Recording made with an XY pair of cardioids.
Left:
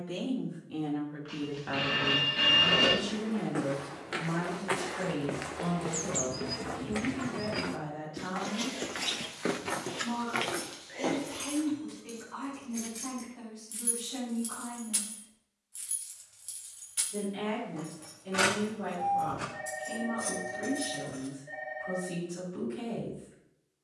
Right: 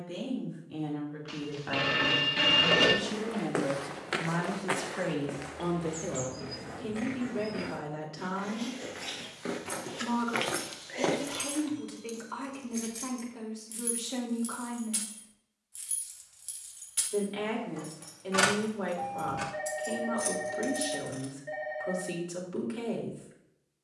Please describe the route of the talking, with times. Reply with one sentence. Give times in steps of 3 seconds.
You can hear the talking in the centre from 0 s and on the right from 3 s.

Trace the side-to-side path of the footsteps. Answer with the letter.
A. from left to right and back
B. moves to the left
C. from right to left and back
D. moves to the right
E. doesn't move
C.